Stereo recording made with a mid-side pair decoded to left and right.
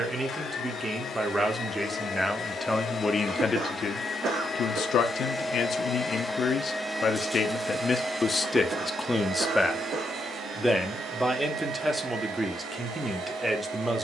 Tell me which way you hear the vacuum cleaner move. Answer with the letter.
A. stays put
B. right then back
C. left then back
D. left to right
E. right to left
D.